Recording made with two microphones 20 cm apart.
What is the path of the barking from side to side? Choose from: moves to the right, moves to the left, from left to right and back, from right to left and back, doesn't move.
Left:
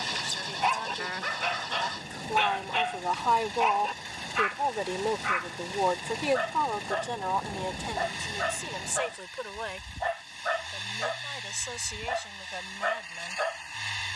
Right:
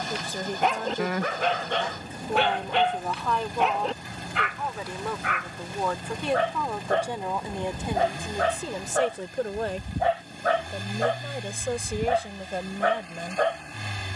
doesn't move.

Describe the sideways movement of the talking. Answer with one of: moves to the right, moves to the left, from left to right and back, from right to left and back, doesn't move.
from right to left and back.